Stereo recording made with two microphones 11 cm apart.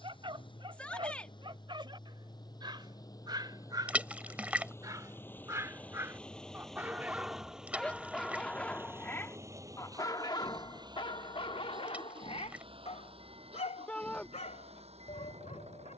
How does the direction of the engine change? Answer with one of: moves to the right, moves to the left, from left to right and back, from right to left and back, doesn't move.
moves to the right.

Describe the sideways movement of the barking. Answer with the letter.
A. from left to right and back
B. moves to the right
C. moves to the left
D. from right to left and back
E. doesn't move
C.